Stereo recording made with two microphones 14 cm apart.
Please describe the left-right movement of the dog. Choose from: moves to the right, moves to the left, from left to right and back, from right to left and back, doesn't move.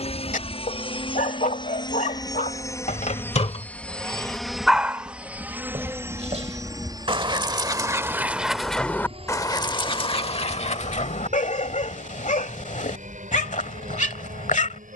from left to right and back.